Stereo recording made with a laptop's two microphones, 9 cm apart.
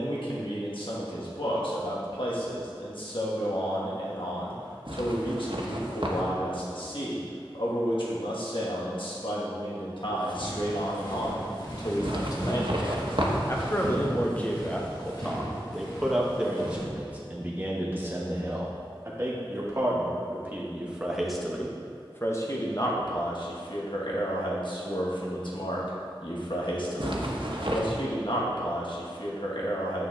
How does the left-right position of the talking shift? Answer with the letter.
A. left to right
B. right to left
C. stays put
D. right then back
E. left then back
D.